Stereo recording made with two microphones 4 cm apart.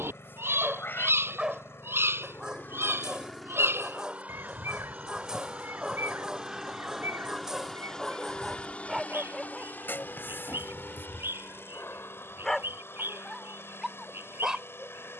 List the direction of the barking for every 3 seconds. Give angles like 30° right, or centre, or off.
20° right, 20° right, 10° right, 10° left, centre.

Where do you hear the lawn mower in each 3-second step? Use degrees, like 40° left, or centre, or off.
70° left, 20° right, 10° left, 60° left, 80° left.